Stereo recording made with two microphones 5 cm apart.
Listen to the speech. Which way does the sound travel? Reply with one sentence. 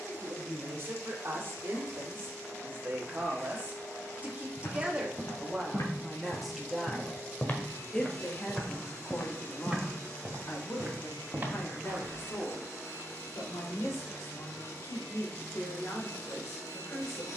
You can hear the speech go from the right side to the left.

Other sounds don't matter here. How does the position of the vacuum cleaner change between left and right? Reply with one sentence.
You can hear the vacuum cleaner stay put.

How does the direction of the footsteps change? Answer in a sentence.
You can hear the footsteps move from left to right.